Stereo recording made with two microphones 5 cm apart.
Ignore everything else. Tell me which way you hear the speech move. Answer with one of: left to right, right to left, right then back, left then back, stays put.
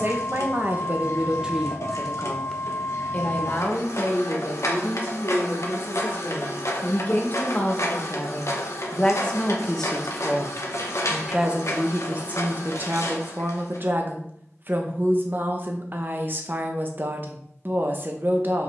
left then back.